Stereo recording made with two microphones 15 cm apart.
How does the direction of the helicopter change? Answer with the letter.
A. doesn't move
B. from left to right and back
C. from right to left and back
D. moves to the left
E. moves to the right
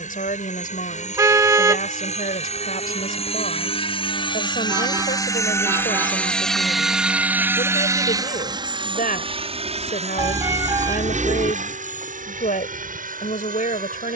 E.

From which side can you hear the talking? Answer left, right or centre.
left.